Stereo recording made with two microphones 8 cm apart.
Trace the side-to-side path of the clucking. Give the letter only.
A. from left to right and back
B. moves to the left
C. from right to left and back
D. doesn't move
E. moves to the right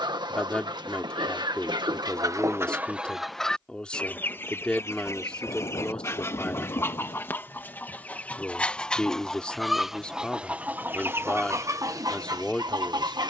C.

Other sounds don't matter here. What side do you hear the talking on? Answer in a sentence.
In this clip you hear the talking in the centre.